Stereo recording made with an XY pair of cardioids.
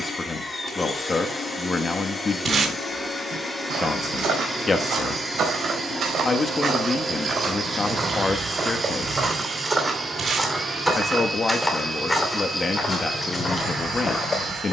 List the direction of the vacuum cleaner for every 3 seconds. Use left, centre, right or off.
left, centre, centre, right, right.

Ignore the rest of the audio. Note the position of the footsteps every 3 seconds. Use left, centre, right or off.
off, right, right, centre, left.